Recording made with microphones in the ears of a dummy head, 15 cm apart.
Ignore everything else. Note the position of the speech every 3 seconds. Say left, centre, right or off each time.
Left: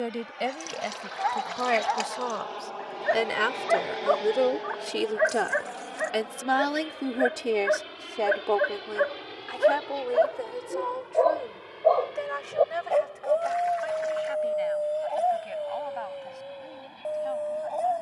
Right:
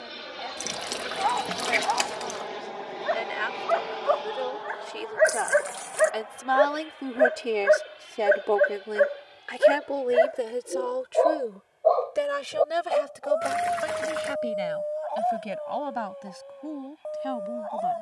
left, left, centre, right, right, right.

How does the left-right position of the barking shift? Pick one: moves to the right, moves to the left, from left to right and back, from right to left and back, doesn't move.
from left to right and back.